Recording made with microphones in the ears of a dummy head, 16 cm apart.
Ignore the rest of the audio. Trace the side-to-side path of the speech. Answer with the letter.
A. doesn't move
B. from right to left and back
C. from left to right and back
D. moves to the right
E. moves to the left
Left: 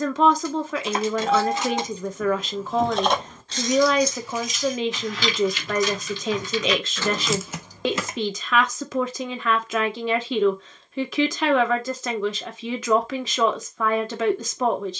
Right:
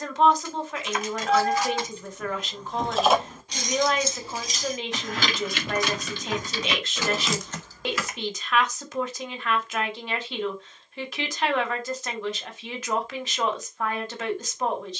A.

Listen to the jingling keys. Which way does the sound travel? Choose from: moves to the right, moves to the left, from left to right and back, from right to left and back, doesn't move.
from left to right and back.